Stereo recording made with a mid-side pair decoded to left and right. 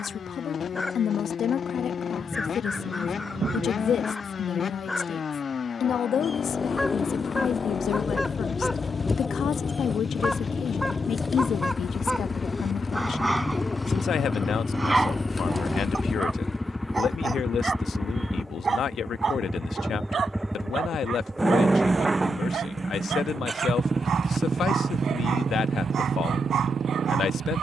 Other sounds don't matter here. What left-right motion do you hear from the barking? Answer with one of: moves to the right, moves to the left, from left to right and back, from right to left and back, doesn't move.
moves to the right.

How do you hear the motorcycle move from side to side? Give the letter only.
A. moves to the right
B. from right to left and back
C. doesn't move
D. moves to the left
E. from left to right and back
A.